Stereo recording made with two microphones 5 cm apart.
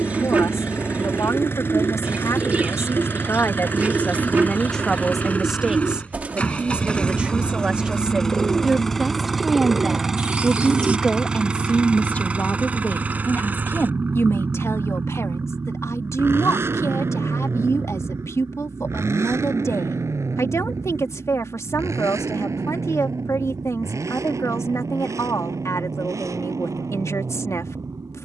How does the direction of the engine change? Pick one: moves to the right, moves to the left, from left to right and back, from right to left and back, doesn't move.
moves to the right.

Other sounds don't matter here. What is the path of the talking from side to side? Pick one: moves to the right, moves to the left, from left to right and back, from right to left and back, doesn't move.
from left to right and back.